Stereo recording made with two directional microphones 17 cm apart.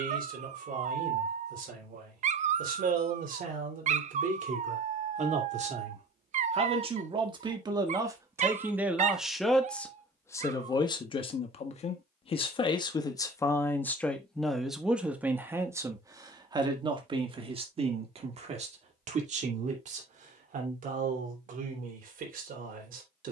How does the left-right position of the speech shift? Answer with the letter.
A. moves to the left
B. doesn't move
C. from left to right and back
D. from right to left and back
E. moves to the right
D.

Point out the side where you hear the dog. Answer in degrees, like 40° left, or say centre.
40° right.